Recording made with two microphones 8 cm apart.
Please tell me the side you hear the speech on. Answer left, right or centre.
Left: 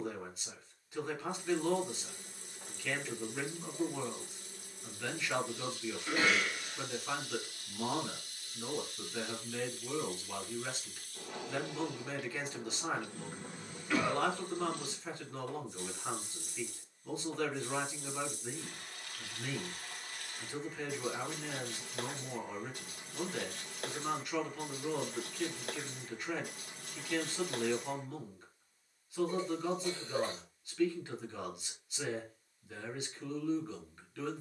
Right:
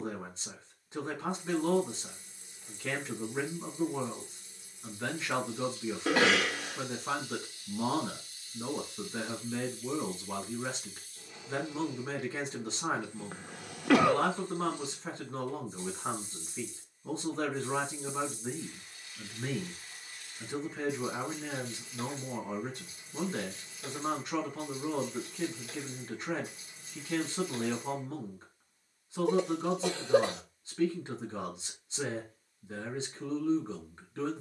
right.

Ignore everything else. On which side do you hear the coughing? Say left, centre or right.
right.